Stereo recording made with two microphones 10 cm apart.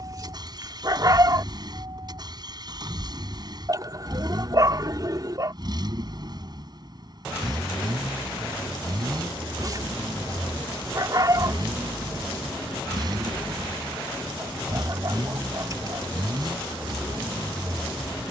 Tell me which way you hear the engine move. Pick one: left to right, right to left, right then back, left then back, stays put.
stays put.